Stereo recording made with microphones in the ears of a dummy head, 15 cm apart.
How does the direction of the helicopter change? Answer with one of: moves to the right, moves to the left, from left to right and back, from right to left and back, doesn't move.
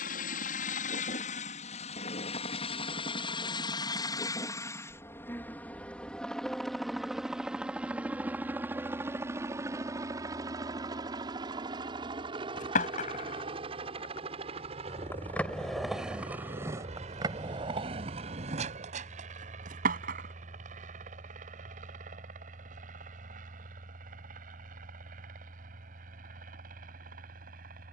moves to the right.